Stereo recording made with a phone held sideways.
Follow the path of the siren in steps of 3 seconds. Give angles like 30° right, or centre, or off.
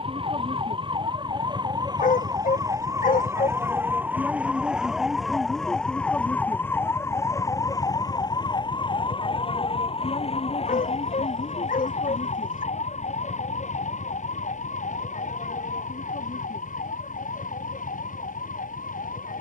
30° right, 10° right, 20° left, 50° left, 60° left, 70° left, 70° left.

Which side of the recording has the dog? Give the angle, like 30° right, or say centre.
80° left.